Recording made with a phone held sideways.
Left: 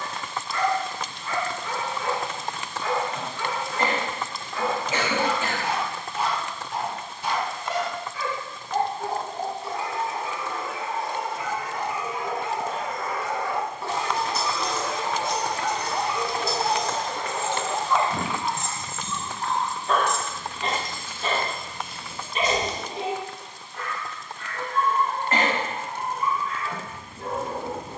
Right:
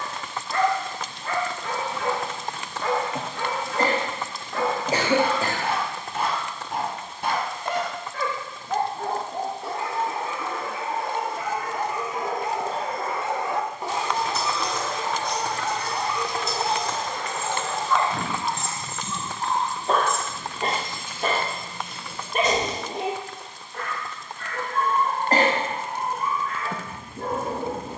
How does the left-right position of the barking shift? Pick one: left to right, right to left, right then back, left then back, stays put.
left then back.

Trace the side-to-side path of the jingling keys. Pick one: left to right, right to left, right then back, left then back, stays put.
right then back.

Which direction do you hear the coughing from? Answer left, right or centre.
right.